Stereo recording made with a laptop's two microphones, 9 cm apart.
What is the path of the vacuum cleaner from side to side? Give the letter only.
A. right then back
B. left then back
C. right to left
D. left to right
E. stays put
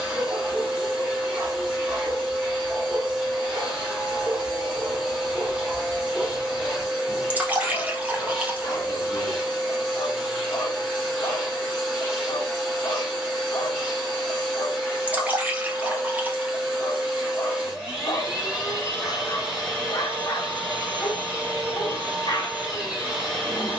E.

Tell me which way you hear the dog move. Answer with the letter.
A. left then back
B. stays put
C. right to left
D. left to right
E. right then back
C.